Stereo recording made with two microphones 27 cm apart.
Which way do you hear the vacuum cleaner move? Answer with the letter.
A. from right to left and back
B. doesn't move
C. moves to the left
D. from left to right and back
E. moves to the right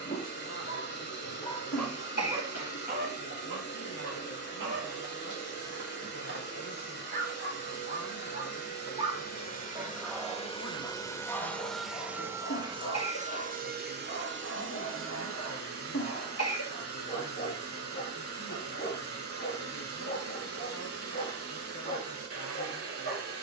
E.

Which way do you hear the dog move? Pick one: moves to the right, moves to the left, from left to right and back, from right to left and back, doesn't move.
from left to right and back.